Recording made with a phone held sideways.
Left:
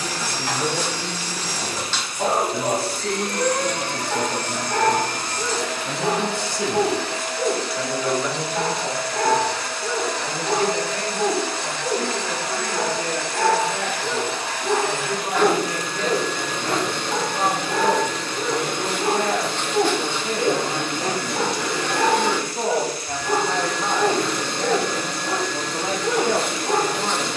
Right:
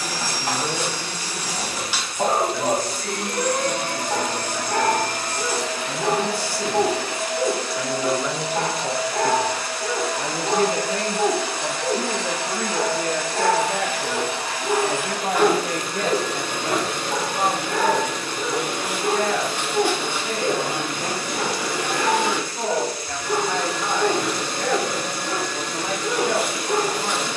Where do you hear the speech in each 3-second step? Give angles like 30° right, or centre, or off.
30° left, 30° left, 10° left, 40° right, 60° right, 30° right, 20° left, 20° left, 20° left.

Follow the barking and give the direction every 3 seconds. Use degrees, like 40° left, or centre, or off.
30° right, 30° right, 30° right, 30° right, 10° right, 10° left, 30° left, 50° left, 50° left.